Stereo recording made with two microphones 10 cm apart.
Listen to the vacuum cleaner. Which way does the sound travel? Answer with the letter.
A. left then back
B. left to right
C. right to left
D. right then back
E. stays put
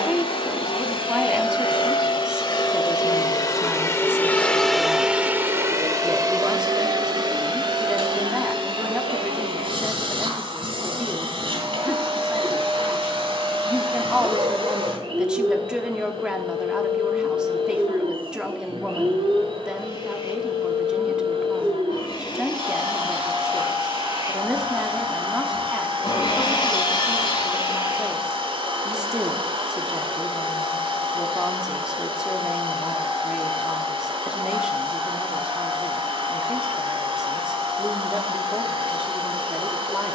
B.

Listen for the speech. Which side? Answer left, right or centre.
centre.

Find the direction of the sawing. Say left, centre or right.
left.